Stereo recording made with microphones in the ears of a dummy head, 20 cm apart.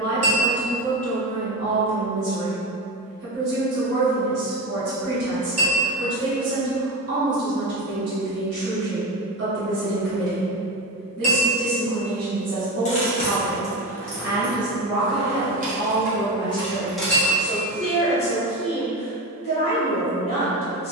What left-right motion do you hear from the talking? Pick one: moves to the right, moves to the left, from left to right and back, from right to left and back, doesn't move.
moves to the left.